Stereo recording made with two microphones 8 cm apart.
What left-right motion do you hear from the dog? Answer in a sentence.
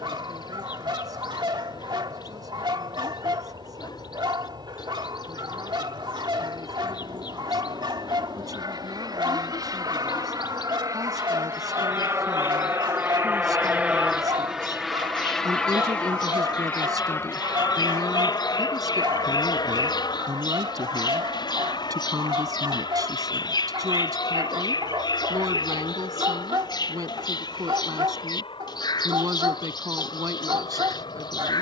In this clip you hear the dog stay put.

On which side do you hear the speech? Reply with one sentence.
You can hear the speech on the right.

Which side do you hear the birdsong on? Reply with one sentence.
In this clip you hear the birdsong on the left.